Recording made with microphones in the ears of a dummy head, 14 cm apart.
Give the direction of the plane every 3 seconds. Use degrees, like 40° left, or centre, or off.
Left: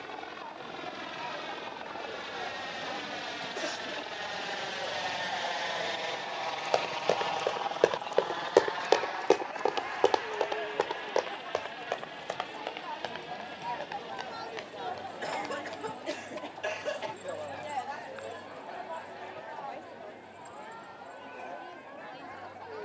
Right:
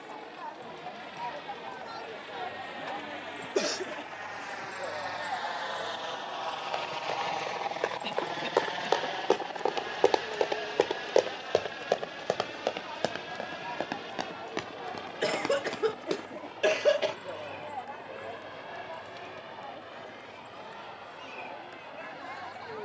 60° left, 40° left, 10° right, 40° right, 60° right, 70° right, 70° right, 80° right.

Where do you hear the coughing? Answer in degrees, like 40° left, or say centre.
70° right.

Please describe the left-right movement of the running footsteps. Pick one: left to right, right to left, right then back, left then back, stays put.
left to right.